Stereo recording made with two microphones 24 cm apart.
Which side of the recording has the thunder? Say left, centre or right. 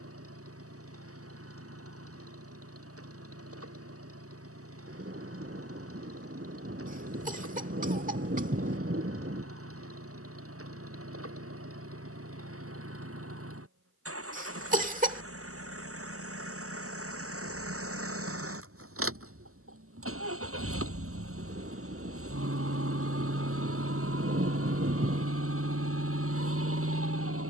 right.